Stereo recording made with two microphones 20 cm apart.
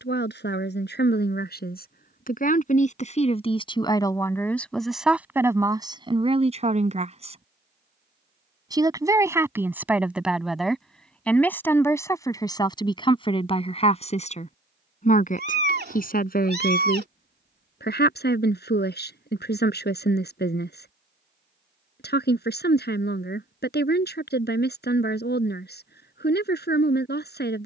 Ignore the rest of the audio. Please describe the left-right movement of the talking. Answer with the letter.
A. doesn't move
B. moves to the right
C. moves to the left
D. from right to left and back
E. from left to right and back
E.